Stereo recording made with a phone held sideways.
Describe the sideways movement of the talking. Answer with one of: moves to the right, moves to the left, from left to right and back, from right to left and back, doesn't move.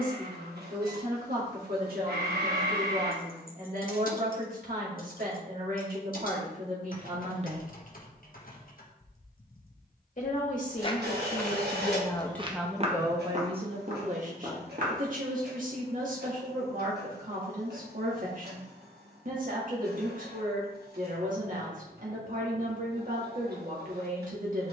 from right to left and back.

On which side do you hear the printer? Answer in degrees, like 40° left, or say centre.
80° right.